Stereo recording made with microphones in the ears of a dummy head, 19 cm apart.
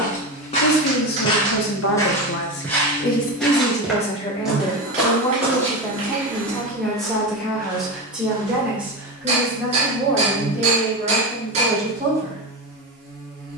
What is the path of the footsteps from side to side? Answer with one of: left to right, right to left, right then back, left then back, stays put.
left to right.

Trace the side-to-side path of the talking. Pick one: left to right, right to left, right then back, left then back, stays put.
left to right.